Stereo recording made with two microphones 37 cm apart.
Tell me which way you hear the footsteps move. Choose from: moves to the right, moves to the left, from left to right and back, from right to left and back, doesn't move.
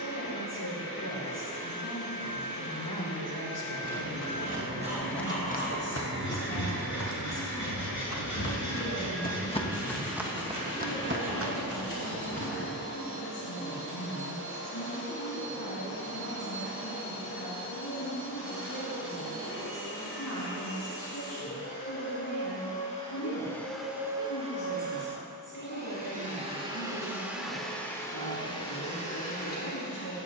from right to left and back.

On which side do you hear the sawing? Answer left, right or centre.
left.